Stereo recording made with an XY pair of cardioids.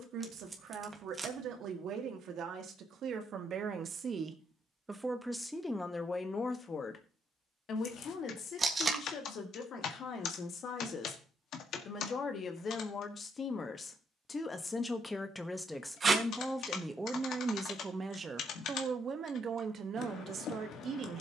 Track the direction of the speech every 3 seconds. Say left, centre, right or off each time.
right, right, left, left, left, centre, right.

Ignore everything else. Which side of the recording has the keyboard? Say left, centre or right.
left.